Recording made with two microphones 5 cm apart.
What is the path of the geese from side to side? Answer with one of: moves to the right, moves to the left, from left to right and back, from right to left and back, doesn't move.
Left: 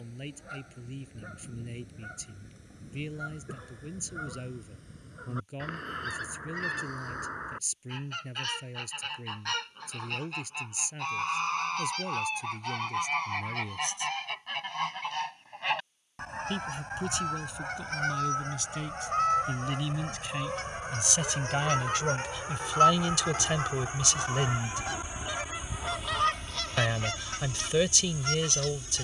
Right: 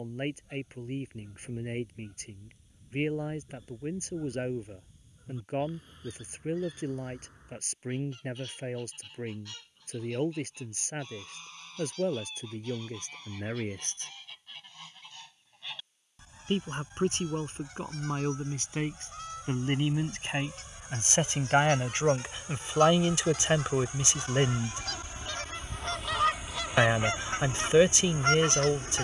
moves to the right.